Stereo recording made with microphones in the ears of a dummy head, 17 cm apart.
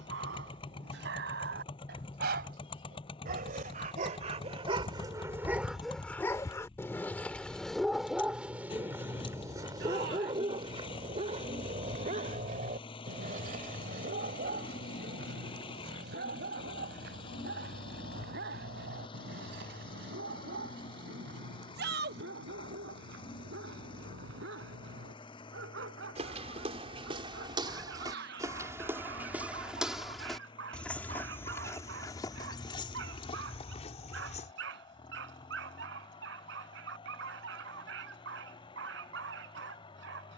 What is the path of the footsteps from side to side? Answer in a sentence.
You can hear the footsteps go from the right side to the left.